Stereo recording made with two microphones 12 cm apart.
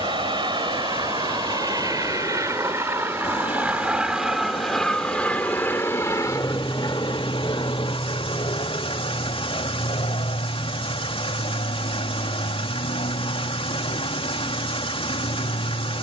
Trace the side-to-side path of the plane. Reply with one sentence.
In this clip you hear the plane go from the right side to the left.